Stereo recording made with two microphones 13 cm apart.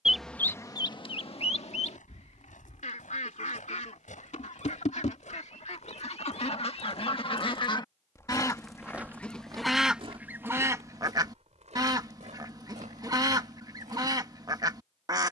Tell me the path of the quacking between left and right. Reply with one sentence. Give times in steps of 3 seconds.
You can hear the quacking on the left from 0 s, in the centre from 9 s and on the right from 12 s.